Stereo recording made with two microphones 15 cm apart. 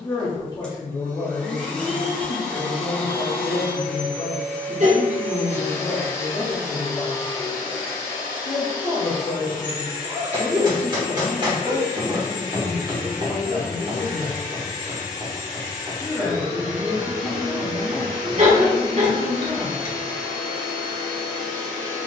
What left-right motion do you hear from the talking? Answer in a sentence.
You can hear the talking move from left to right and back again.